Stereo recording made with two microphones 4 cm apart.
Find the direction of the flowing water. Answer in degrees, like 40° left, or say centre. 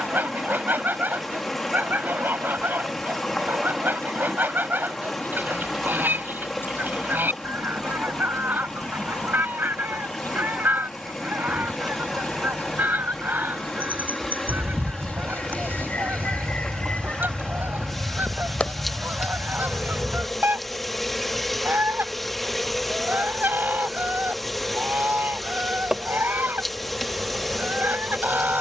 centre.